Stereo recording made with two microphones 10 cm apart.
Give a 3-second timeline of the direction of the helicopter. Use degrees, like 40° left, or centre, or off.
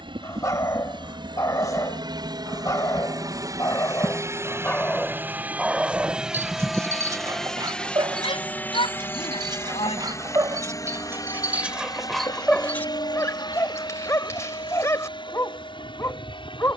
50° right, 30° right, 10° left, 30° left, 50° left, 50° left.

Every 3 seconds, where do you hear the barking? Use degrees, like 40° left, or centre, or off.
40° left, 20° left, 40° right, 30° right, 20° left, 30° left.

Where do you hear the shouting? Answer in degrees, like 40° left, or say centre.
70° left.